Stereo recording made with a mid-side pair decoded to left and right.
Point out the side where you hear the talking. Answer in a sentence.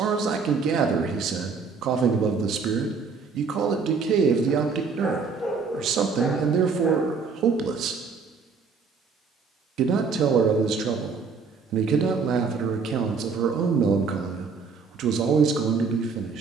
You can hear the talking on the right.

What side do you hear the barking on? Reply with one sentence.
In this clip you hear the barking on the left.